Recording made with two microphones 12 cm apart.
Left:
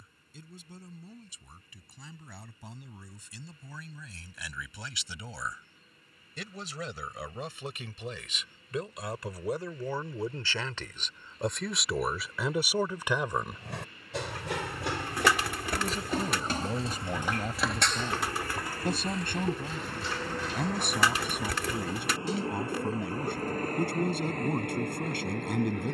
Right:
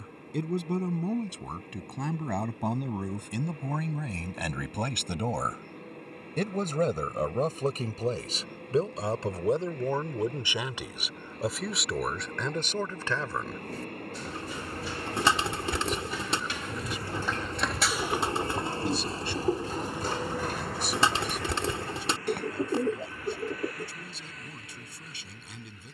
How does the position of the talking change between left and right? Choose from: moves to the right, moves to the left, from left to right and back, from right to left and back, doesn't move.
moves to the left.